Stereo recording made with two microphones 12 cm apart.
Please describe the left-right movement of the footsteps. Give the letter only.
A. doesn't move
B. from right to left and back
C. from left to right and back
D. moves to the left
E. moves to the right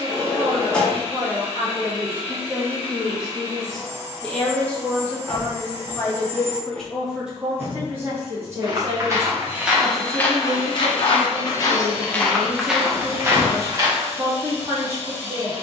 B.